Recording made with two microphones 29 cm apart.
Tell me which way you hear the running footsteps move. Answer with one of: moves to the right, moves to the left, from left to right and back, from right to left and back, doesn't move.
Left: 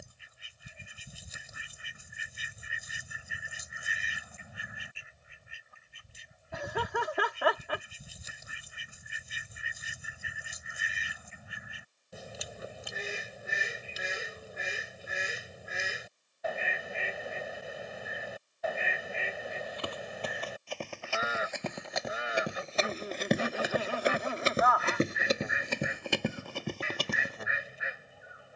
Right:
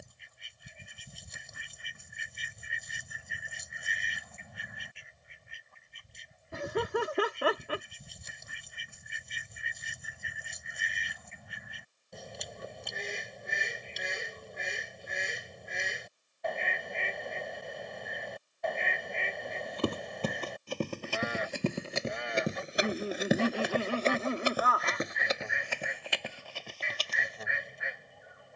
moves to the left.